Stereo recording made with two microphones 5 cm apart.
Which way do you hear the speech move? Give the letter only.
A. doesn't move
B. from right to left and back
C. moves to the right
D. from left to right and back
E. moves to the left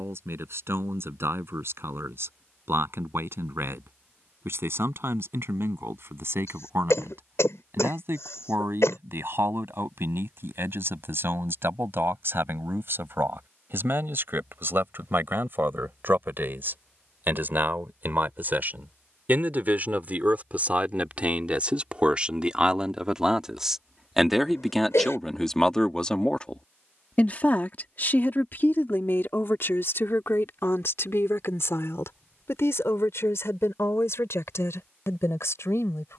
E.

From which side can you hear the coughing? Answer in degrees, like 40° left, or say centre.
80° left.